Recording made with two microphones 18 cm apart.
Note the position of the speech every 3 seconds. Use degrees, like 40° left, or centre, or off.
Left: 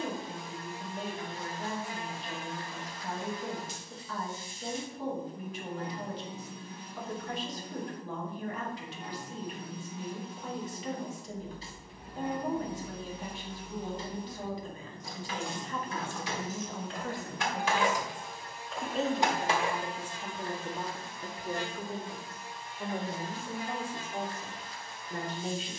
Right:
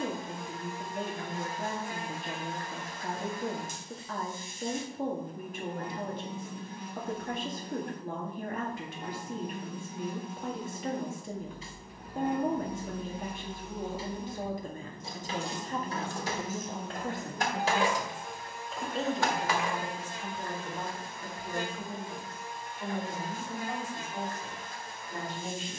50° right, 50° right, 50° right, 50° right, 50° right, 30° right, 10° left, 30° left, 30° left.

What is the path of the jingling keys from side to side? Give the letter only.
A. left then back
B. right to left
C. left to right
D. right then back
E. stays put
D.